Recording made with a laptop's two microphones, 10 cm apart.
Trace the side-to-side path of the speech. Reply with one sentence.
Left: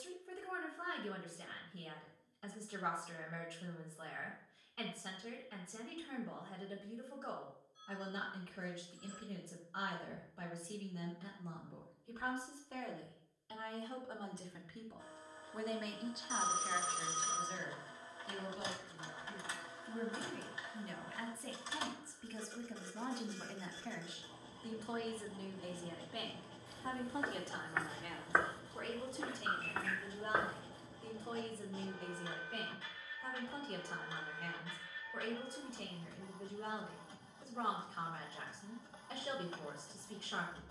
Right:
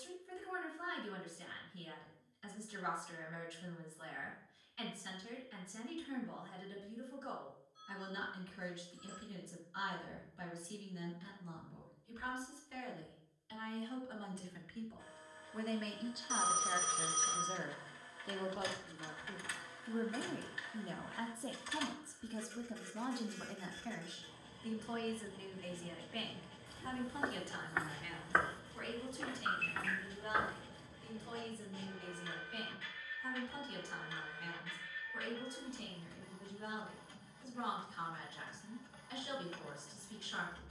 You can hear the speech go right and come back.